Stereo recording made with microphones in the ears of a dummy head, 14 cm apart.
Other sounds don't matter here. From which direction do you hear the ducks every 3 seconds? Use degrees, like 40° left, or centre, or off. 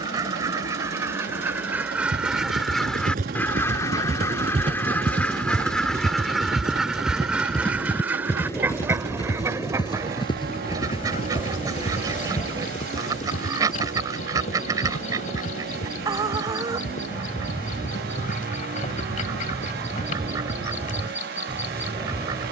10° right, 10° left, 10° right, 20° right, 20° right, 20° right, 20° right, 20° right.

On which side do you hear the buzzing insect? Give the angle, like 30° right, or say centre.
50° left.